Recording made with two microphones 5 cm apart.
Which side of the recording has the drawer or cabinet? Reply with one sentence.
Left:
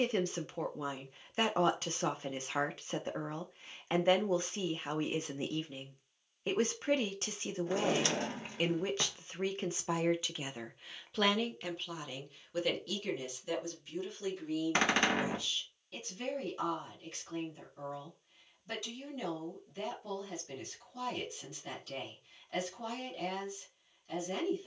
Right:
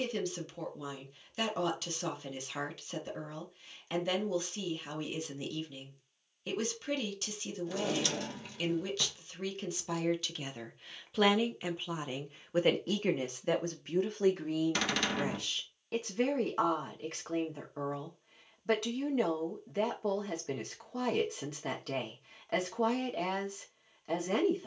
In this clip you hear the drawer or cabinet on the left.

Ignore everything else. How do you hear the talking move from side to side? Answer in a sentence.
In this clip you hear the talking go from the left side to the right.